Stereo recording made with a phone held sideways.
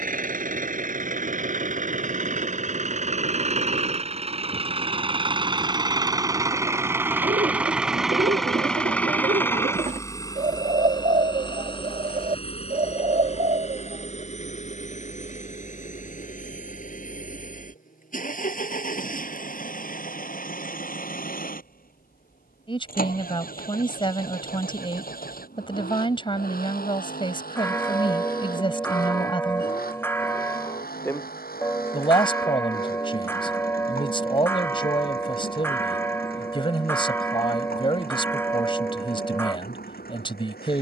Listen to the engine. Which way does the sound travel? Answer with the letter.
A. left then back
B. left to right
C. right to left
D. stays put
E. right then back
C.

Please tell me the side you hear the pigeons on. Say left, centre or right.
right.